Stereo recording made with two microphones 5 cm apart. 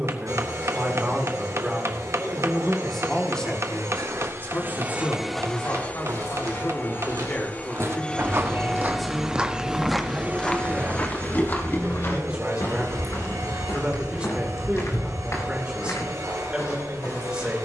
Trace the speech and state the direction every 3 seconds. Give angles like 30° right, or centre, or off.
10° right, 30° left, 20° left, 10° right, 20° right, 20° right.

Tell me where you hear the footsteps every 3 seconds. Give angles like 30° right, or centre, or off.
off, 80° right, 60° right, 10° left, 50° left, 60° left.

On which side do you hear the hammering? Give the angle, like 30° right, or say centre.
60° right.